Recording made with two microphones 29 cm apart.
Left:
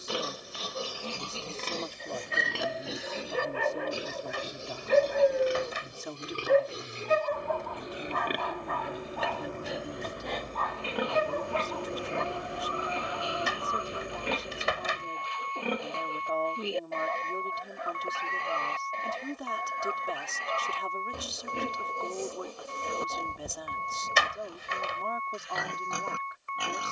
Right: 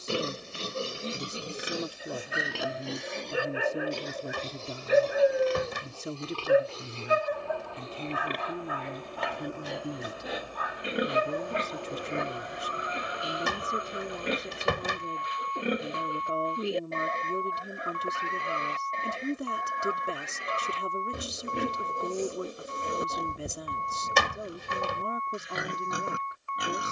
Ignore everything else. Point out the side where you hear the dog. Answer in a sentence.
You can hear the dog in the centre.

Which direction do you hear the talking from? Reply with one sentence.
In this clip you hear the talking on the right.